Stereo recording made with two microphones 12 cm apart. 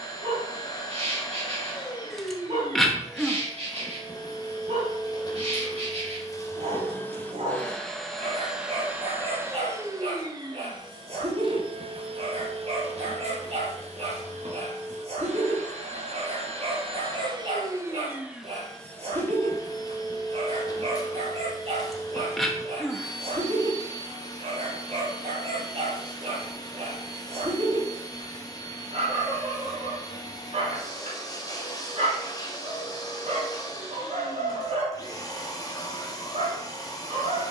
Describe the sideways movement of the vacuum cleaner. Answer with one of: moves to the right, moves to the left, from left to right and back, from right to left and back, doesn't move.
from left to right and back.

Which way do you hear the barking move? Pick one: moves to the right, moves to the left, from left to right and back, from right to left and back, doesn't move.
doesn't move.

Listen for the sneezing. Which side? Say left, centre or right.
centre.